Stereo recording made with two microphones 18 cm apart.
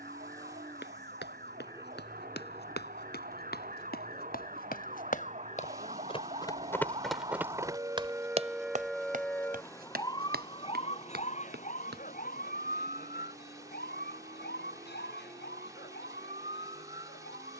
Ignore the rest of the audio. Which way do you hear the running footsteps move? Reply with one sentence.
You can hear the running footsteps travel towards the right.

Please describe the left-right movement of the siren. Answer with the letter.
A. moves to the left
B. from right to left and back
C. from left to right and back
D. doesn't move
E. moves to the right
A.